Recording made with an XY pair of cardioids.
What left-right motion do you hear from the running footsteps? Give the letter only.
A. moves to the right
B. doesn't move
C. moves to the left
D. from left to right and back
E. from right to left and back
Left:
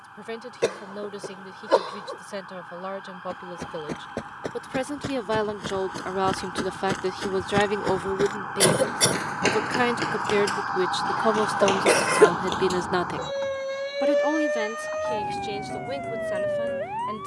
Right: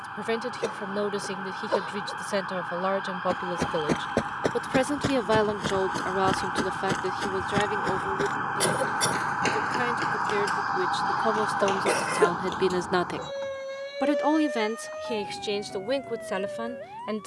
C.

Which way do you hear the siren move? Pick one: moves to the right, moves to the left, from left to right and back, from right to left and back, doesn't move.
moves to the left.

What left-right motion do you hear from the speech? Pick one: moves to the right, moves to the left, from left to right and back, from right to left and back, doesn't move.
from right to left and back.